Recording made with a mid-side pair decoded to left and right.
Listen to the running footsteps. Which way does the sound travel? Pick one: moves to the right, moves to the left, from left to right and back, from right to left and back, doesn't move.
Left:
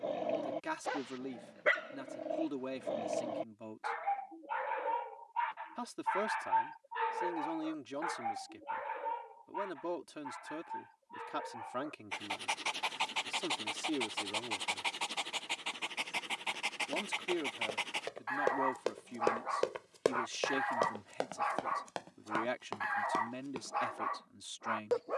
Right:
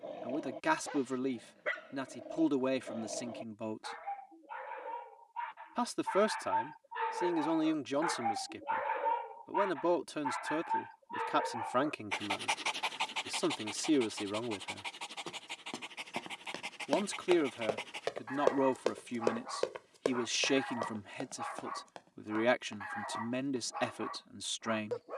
moves to the left.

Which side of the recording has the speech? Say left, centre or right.
right.